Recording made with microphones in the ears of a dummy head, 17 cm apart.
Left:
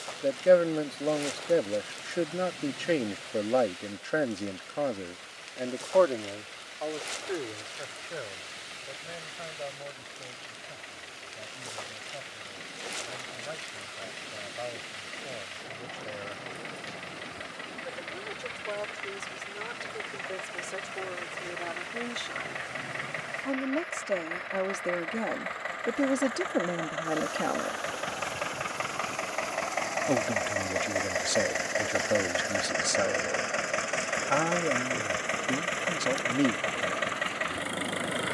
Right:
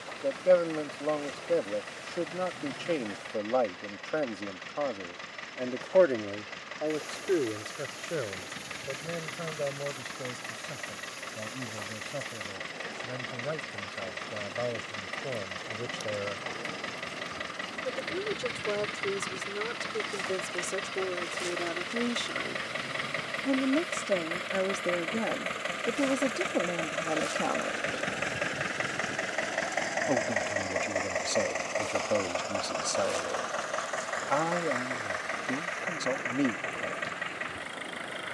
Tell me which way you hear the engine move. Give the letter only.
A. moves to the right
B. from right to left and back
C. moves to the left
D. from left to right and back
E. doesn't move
C.